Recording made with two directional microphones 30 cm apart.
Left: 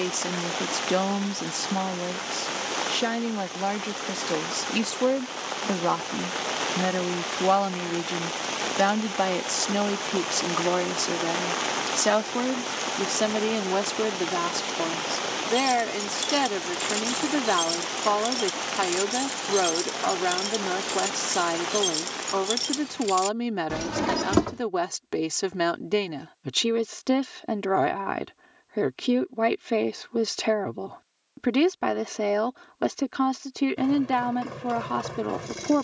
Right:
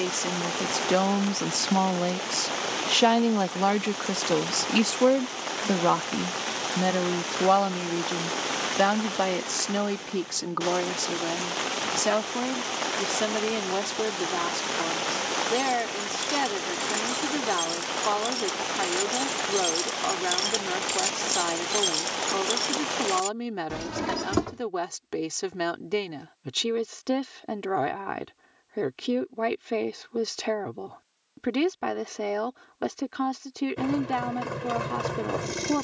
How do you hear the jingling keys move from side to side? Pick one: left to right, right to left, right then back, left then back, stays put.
right then back.